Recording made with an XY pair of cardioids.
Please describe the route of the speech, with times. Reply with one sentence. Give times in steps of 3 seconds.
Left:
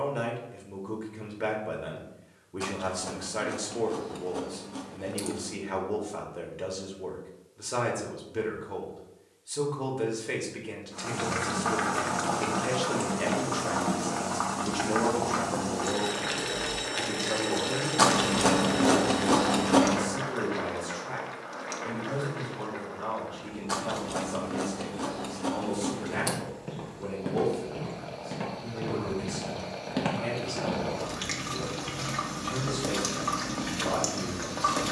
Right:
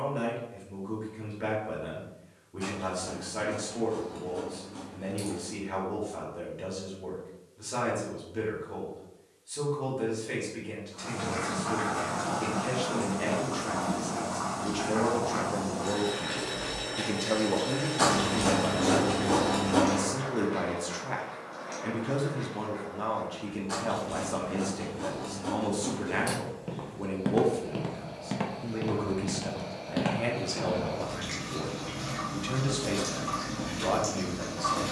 In this clip you hear the speech on the left from 0 s and on the right from 15 s.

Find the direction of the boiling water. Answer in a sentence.
In this clip you hear the boiling water on the left.